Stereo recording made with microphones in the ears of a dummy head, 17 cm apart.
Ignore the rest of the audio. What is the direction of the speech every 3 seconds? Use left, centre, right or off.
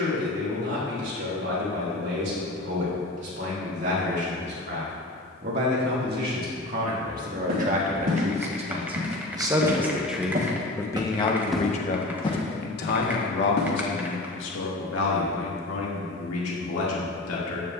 right, right, right, centre, left, left.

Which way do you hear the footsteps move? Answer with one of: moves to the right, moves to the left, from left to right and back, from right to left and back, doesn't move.
moves to the left.